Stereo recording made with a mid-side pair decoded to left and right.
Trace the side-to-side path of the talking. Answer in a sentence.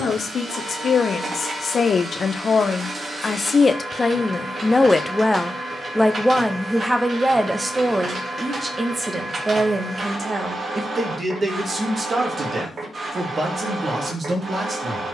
You can hear the talking go from the left side to the right.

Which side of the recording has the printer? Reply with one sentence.
In this clip you hear the printer on the right.